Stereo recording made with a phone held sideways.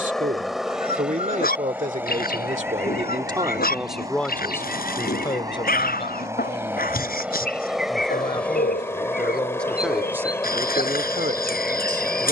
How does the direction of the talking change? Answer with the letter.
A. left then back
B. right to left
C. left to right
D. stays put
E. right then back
A.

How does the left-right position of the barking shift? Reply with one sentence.
You can hear the barking stay in one place.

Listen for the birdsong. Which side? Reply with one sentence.
You can hear the birdsong on the left.